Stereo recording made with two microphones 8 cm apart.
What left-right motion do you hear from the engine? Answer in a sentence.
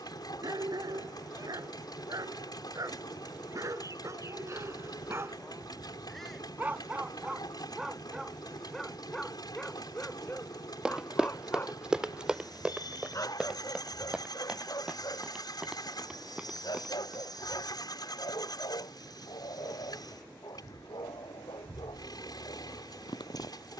In this clip you hear the engine stay in one place.